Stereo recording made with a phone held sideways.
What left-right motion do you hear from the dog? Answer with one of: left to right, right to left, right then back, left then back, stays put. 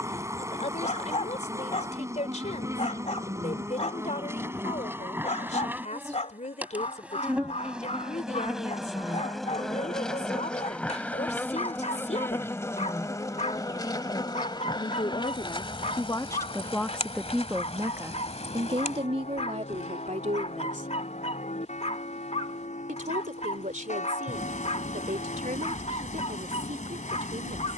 stays put.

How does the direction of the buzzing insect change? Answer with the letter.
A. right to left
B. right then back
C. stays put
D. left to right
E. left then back
A.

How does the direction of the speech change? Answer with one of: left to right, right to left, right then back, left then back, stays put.
left to right.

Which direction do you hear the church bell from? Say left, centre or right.
left.